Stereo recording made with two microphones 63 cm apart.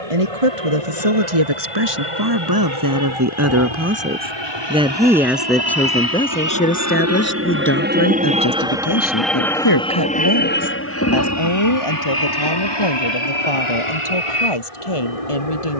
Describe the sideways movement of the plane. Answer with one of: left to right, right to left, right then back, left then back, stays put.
right to left.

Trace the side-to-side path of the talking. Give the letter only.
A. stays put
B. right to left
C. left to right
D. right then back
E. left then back
B.